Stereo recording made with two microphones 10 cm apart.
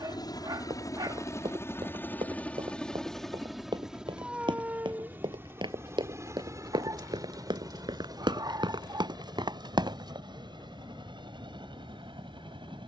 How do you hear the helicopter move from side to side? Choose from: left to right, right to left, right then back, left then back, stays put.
left to right.